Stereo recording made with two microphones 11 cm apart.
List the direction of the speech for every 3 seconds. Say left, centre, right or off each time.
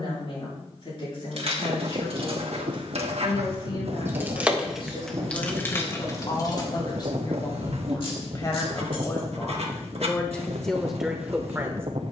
left, left, left, centre.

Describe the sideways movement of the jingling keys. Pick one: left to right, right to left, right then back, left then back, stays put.
right to left.